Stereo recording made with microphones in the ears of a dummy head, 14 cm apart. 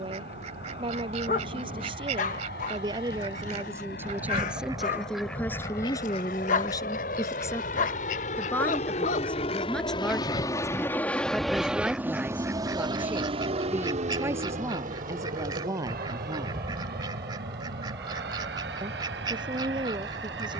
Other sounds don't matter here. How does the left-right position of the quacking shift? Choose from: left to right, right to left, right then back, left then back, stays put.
left then back.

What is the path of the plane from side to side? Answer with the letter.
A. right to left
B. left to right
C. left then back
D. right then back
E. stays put
B.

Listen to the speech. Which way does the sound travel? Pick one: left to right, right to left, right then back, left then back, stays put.
left then back.